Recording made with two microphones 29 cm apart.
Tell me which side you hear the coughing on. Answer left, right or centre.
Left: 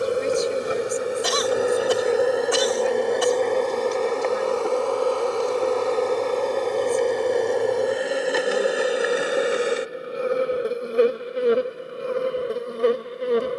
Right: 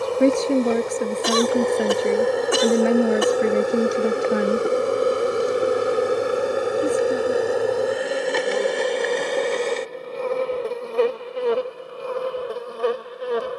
right.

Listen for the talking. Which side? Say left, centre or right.
right.